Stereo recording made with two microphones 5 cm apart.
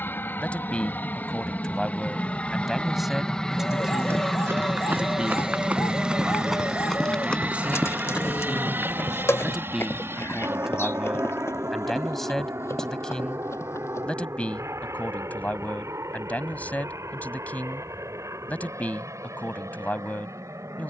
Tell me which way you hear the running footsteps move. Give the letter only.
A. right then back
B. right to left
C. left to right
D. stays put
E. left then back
B.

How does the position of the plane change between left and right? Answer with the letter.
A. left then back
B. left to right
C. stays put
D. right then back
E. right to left
B.